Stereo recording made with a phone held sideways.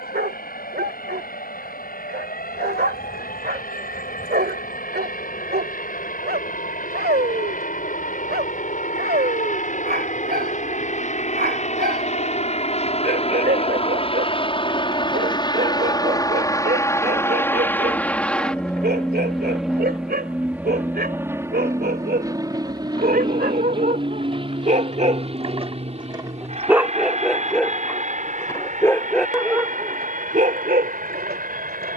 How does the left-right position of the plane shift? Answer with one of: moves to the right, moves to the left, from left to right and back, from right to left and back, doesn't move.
moves to the right.